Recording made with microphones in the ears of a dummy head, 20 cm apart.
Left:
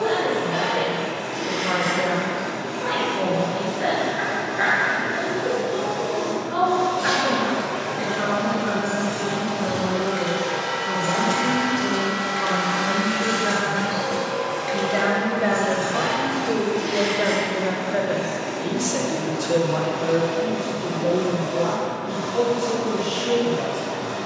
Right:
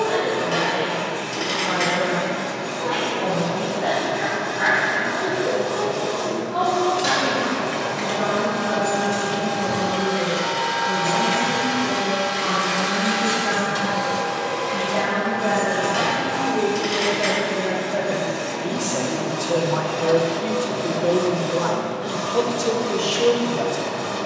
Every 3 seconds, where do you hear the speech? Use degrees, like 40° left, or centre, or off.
80° left, 70° left, 70° left, 70° left, 60° left, 40° left, 10° right, 50° right.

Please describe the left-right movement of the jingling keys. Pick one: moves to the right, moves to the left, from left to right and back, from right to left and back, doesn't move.
moves to the left.